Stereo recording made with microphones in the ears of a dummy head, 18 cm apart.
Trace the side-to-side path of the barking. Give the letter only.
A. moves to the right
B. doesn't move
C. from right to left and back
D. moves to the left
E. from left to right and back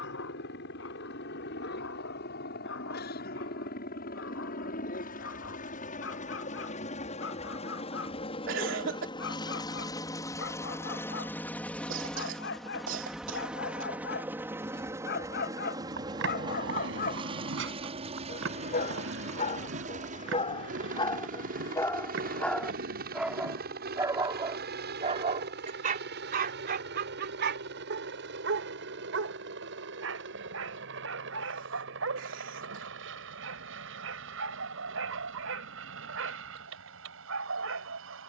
A.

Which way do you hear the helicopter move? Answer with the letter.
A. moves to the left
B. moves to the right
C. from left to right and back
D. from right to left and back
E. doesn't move
B.